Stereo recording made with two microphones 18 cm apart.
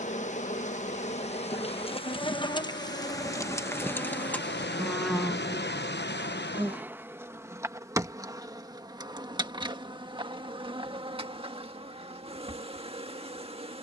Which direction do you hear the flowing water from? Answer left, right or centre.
left.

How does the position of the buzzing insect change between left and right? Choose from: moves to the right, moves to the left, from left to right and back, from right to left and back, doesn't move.
moves to the right.